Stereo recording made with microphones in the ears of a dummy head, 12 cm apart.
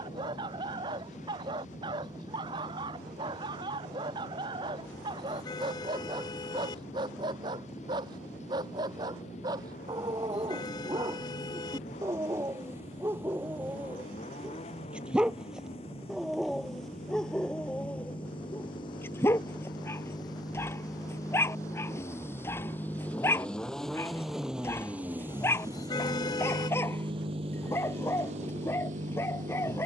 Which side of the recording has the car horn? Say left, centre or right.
left.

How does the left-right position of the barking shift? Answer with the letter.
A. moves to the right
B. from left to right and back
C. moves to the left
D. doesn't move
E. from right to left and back
C.